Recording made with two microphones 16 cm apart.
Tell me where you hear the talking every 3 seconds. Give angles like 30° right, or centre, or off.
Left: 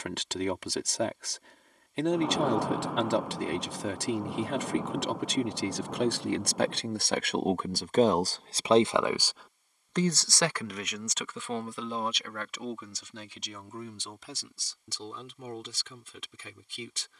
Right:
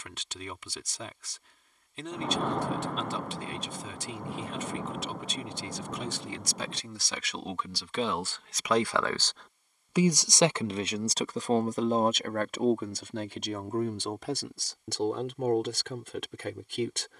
70° left, 70° left, 50° left, 20° right, 60° right, 60° right.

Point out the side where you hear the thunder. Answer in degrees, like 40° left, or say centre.
10° left.